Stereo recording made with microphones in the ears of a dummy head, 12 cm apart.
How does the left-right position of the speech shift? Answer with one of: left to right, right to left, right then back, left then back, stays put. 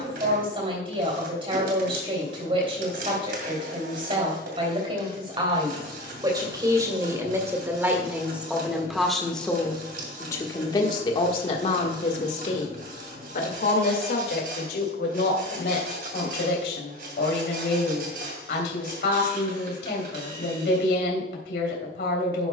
right to left.